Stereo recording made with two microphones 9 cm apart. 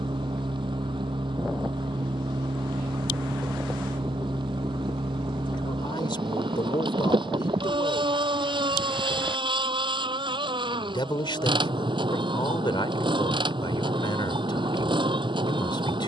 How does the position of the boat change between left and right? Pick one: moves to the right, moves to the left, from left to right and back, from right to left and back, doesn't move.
doesn't move.